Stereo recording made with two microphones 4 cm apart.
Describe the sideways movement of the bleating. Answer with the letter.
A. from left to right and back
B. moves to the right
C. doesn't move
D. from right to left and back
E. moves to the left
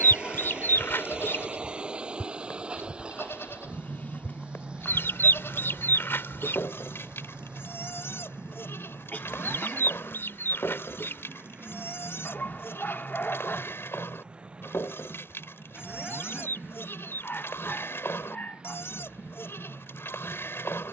C.